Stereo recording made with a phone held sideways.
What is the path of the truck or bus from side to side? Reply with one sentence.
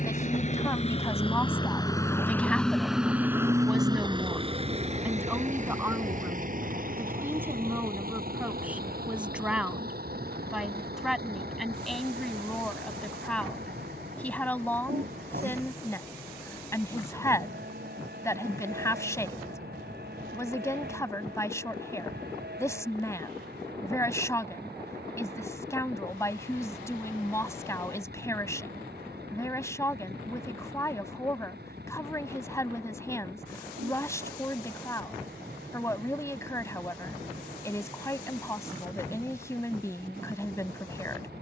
You can hear the truck or bus travel towards the right.